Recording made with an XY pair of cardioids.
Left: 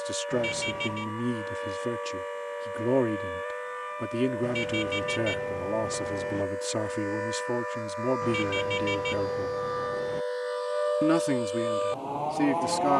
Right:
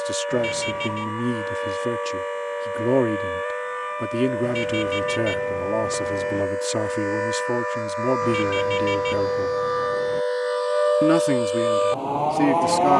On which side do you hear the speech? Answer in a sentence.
In this clip you hear the speech on the right.